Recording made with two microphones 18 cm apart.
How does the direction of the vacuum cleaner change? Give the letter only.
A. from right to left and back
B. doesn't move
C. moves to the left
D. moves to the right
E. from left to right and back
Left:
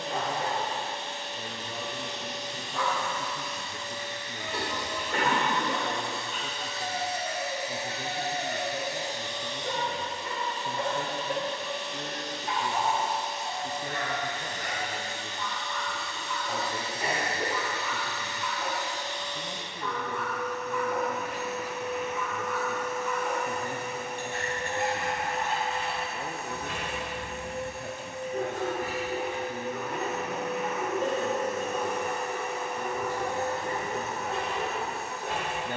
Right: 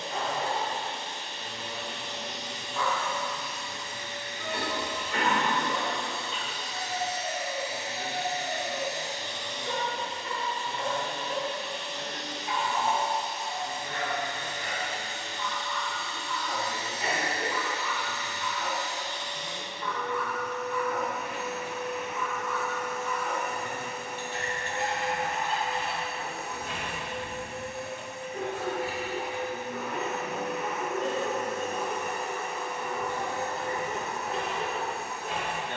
B.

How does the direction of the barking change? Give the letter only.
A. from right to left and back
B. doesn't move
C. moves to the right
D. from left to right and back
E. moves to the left
B.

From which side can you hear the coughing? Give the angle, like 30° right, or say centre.
40° left.